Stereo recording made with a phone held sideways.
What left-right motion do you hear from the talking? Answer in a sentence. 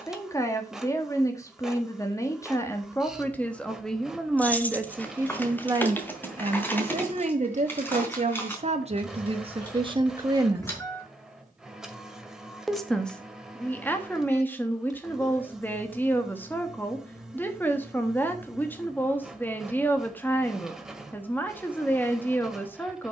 In this clip you hear the talking move from left to right and back again.